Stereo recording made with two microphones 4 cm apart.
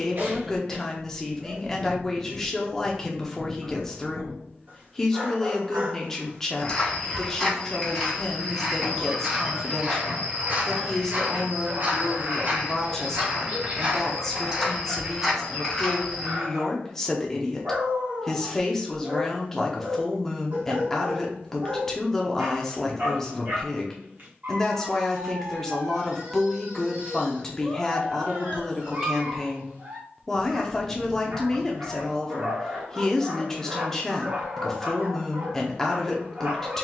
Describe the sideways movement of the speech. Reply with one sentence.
In this clip you hear the speech stay in one place.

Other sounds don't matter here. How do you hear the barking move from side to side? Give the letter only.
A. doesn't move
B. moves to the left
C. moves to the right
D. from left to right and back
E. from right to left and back
A.